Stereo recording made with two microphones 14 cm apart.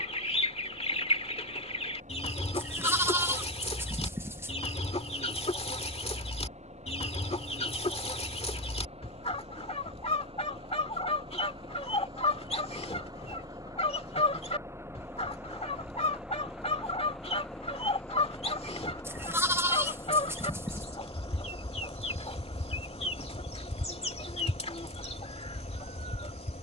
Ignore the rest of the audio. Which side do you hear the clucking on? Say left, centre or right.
left.